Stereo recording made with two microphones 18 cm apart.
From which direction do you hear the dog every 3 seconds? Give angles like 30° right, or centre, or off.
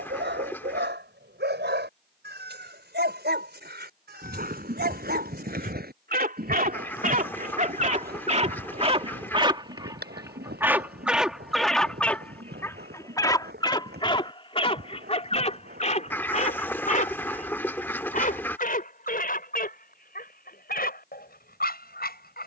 70° right, 60° right, 50° right, 10° right, 20° left, 40° left, 50° left, 60° left.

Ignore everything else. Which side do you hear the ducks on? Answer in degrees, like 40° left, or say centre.
10° left.